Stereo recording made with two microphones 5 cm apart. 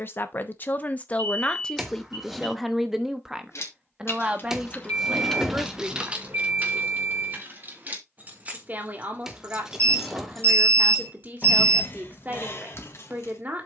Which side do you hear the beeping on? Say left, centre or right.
right.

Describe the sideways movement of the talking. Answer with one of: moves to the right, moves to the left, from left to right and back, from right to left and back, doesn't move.
moves to the right.